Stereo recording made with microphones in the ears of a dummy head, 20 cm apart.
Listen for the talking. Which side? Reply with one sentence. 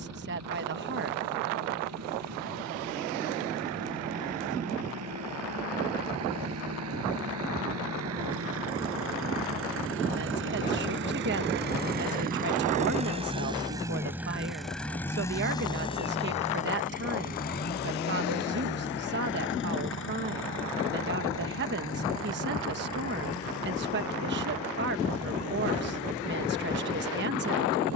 You can hear the talking on the right.